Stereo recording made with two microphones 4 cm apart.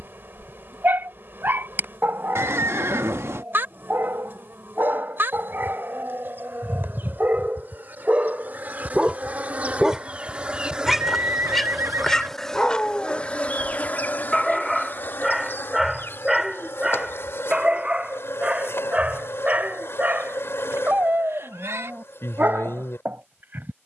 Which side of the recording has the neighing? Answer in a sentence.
In this clip you hear the neighing on the right.